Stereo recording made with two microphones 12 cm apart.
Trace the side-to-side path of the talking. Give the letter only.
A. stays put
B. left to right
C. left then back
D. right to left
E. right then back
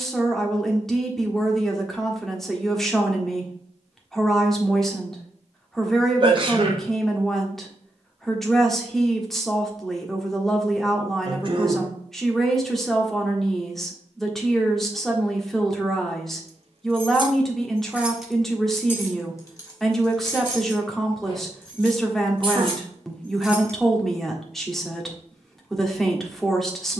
A.